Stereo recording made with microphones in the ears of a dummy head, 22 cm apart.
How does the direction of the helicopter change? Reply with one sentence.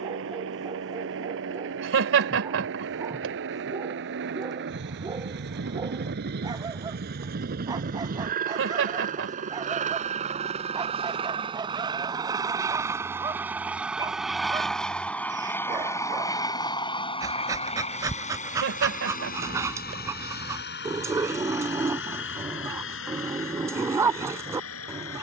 You can hear the helicopter move from right to left.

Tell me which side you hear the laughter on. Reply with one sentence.
You can hear the laughter on the right.